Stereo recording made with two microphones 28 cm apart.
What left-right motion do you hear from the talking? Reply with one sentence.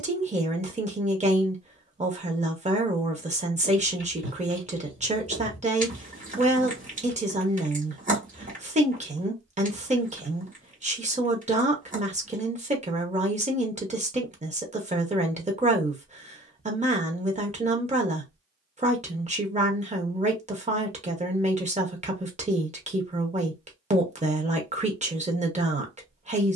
In this clip you hear the talking stay in one place.